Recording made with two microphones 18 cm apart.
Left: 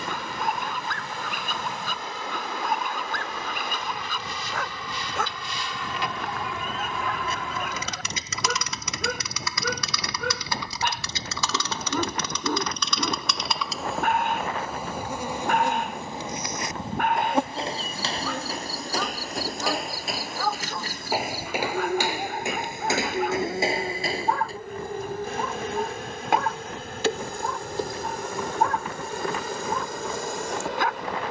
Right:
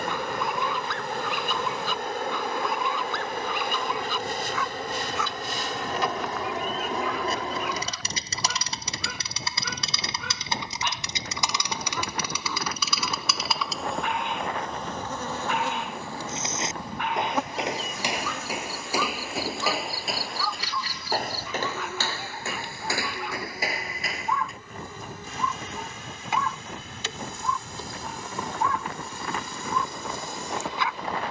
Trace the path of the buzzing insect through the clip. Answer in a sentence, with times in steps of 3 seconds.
You can hear the buzzing insect on the right from 0 s, in the centre from 12 s and on the left from 15 s.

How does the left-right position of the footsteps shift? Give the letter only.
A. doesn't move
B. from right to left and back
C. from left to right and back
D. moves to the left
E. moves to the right
D.